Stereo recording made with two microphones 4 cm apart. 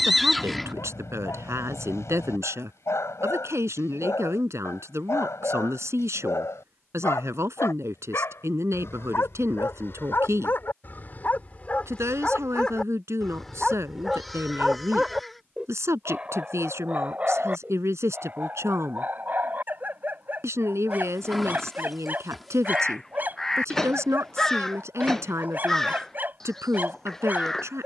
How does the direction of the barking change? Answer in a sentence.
You can hear the barking move to the right.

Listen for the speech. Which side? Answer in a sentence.
In this clip you hear the speech on the right.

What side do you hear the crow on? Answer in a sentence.
You can hear the crow in the centre.